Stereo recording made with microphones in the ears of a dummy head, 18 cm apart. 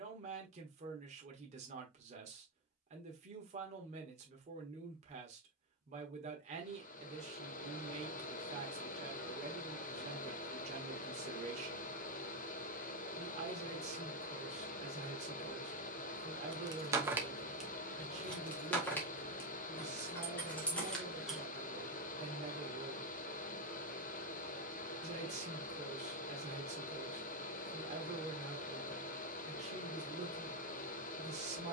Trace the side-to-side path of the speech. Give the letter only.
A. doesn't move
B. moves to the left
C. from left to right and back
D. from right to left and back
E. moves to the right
A.